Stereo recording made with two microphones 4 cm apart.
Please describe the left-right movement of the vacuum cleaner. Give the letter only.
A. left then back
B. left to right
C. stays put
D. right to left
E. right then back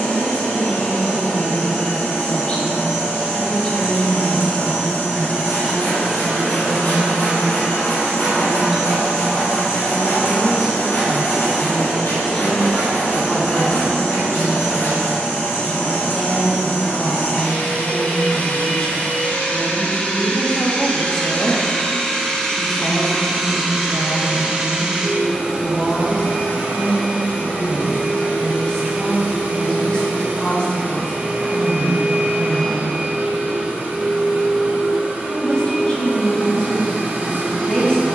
B.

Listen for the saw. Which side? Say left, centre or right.
left.